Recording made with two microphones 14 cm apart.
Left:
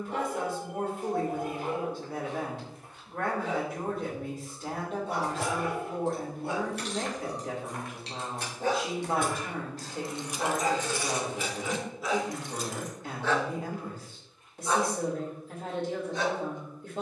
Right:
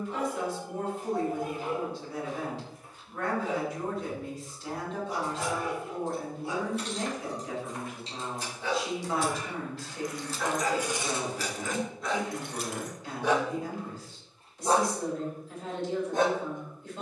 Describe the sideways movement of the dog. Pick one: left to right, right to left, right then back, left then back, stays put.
left to right.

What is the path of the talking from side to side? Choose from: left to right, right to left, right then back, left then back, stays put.
stays put.